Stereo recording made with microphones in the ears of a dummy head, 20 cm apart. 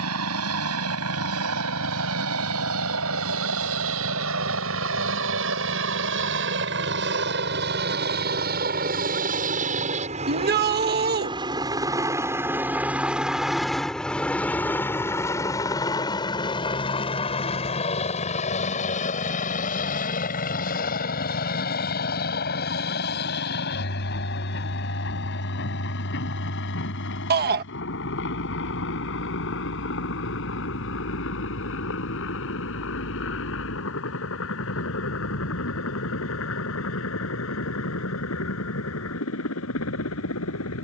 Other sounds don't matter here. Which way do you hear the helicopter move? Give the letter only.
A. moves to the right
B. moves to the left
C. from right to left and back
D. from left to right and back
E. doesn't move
B.